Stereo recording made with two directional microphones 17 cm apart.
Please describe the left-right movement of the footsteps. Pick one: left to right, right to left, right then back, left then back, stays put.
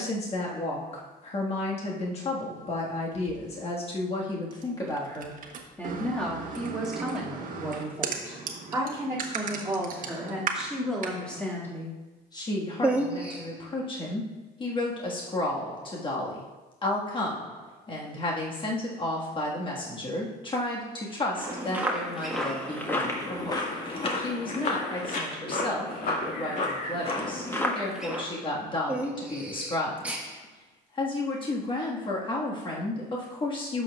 left then back.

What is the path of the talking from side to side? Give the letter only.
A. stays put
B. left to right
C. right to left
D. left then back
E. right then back
E.